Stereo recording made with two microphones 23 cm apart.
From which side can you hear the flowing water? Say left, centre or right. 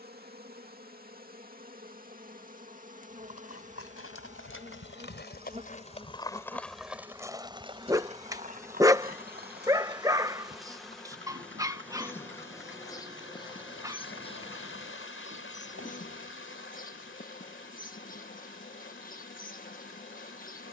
left.